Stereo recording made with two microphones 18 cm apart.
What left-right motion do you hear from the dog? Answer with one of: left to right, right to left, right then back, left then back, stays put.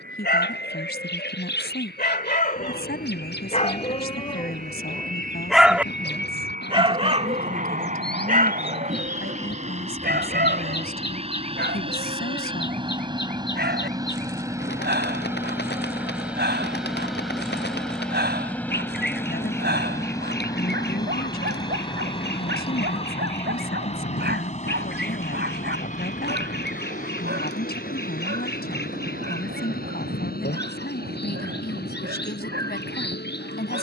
left to right.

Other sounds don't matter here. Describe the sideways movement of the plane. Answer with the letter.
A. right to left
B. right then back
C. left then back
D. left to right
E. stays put
A.